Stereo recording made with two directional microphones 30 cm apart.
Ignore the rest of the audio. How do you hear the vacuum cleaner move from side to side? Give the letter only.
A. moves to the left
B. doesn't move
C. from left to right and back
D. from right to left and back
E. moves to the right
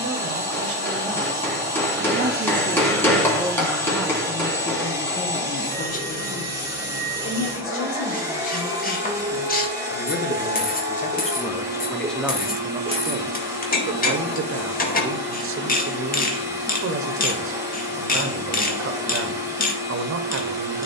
B.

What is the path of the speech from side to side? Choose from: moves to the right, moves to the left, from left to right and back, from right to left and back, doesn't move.
from right to left and back.